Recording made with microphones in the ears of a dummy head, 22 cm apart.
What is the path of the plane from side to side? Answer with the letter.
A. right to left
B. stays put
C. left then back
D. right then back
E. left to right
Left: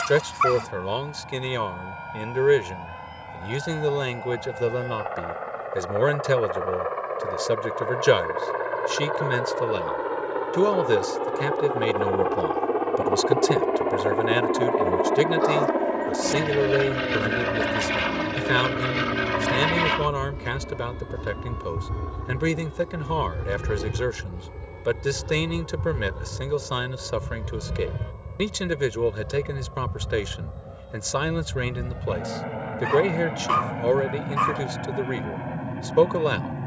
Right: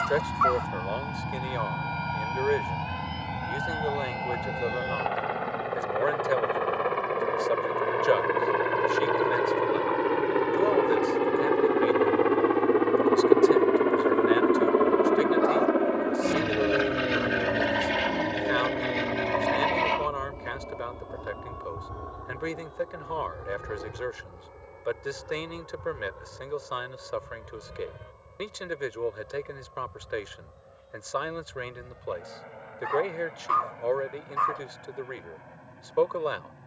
A.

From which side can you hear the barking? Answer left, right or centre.
left.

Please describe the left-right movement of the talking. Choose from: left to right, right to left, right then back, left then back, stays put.
stays put.